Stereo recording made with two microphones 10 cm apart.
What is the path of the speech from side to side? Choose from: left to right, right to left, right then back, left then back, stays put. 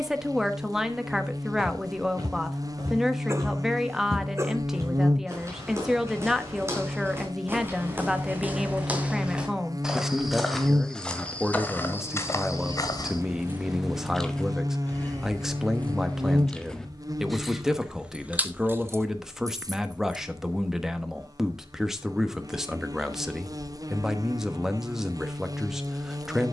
stays put.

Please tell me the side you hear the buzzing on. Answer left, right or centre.
right.